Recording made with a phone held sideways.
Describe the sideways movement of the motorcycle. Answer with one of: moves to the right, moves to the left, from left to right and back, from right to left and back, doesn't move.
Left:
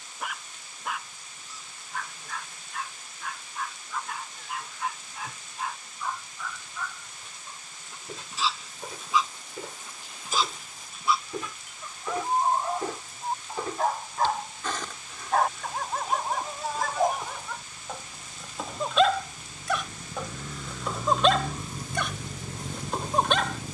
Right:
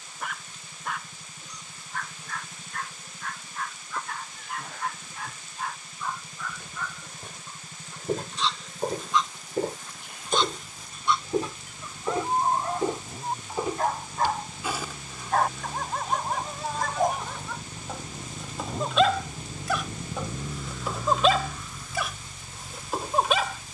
moves to the left.